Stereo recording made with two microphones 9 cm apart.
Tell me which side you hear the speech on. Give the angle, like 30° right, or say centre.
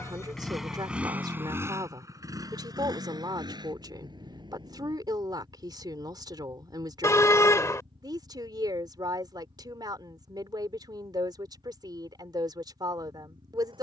50° right.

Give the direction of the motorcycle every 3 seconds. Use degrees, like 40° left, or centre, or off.
20° right, 60° right, 70° right, 80° right, 80° right.